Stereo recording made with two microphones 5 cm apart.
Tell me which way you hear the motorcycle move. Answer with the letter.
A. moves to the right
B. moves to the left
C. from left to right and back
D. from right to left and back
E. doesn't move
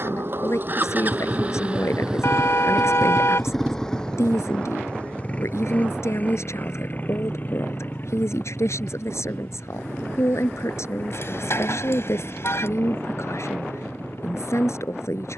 B.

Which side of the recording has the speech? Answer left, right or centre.
left.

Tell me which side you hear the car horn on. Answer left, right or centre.
left.